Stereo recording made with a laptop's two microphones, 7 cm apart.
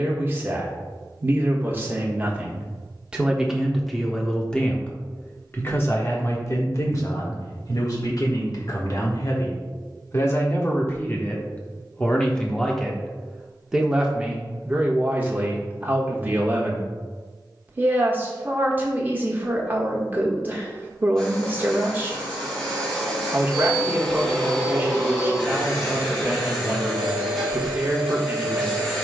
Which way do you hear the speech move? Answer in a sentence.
You can hear the speech go left and come back.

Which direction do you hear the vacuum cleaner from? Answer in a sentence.
You can hear the vacuum cleaner in the centre.